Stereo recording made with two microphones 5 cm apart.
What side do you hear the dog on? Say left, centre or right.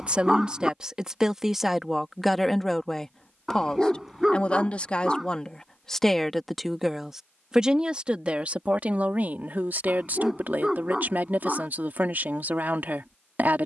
centre.